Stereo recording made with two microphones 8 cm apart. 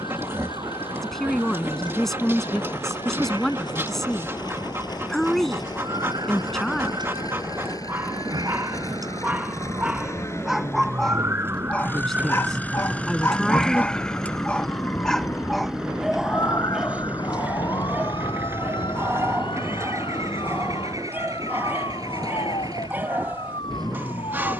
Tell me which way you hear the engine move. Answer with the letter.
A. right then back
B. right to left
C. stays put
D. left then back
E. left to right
E.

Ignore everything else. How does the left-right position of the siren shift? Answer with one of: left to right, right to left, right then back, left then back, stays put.
right to left.